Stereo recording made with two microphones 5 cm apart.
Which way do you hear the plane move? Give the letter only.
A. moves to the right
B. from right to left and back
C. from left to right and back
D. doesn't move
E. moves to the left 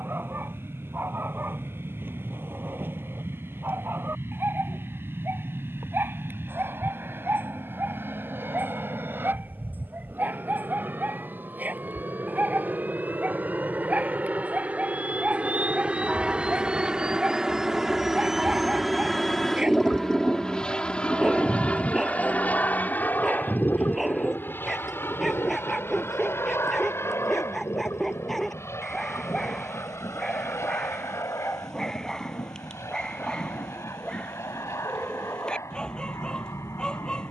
E.